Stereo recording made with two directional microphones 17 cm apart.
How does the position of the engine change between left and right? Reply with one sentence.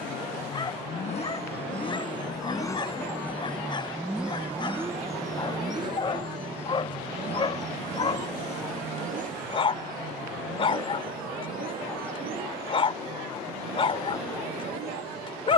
You can hear the engine travel towards the right.